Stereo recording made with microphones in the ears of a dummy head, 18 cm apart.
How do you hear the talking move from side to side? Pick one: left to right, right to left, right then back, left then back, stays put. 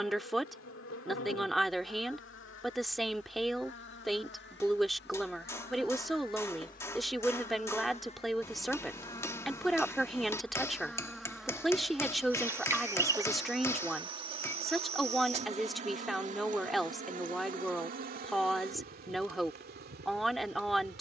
stays put.